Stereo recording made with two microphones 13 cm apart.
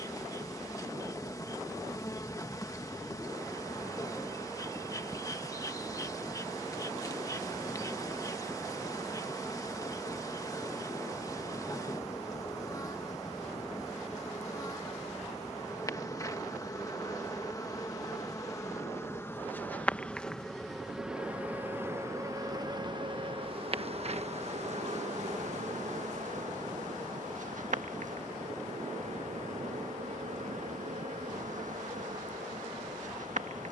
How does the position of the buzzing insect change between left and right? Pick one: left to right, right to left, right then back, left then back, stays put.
left to right.